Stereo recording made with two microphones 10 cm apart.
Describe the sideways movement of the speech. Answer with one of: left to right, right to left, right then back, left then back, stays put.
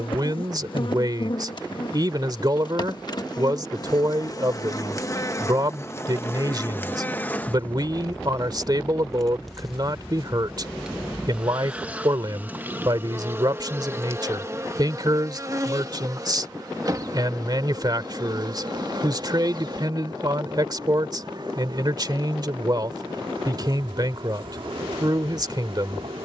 stays put.